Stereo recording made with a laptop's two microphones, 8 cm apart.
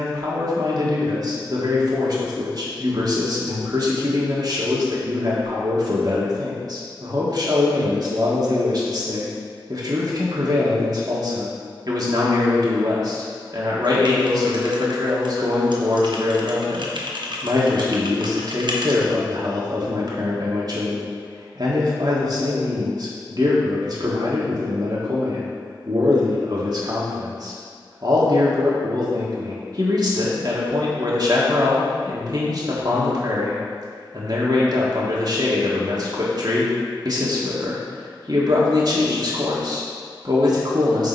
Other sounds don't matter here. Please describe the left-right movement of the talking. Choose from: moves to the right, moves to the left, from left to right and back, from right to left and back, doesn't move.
doesn't move.